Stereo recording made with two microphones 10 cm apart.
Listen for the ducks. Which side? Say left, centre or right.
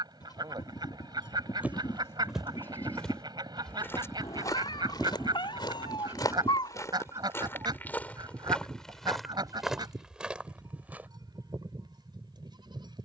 right.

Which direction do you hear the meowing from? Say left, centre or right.
left.